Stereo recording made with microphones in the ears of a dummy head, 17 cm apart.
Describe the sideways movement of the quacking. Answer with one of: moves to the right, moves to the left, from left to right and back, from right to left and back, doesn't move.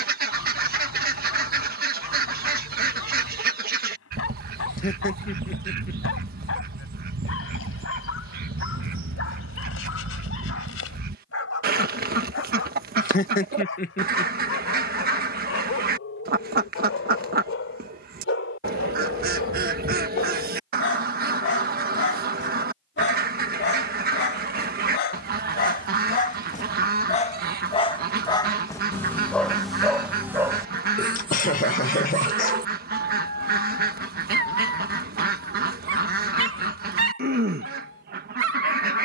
doesn't move.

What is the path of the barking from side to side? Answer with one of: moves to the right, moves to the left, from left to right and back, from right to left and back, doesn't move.
moves to the right.